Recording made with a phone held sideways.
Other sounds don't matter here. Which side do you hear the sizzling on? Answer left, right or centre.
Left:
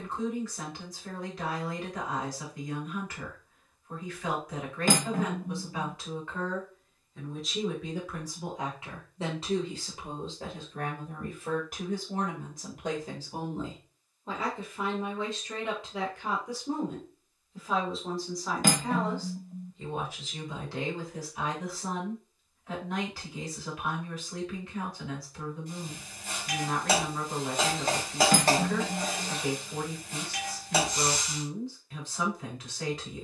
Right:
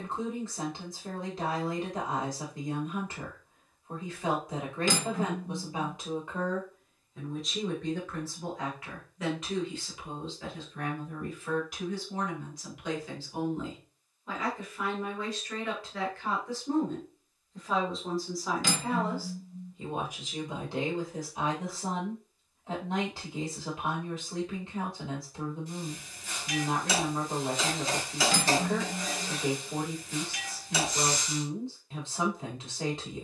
left.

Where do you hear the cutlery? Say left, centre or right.
left.